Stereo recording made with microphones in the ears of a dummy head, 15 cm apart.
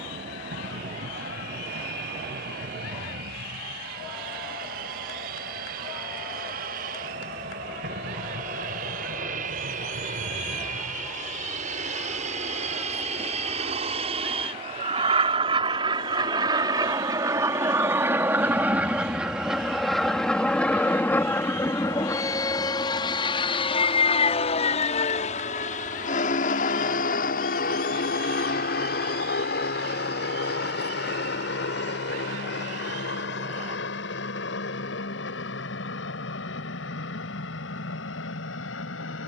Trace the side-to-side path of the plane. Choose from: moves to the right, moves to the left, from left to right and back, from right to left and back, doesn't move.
moves to the left.